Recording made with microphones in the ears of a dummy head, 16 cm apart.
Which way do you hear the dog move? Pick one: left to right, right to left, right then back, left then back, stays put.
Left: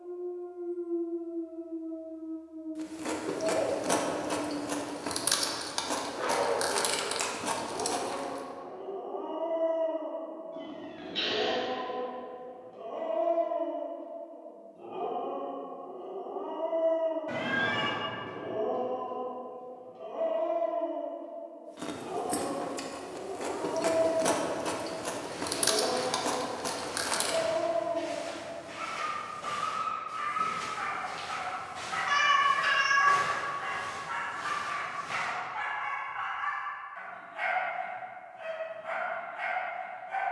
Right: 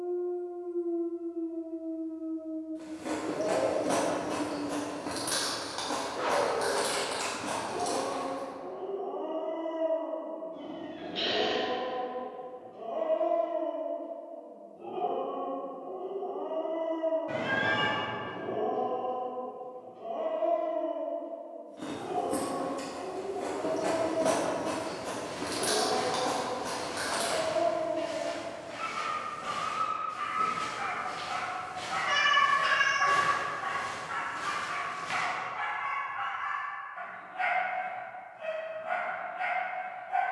right to left.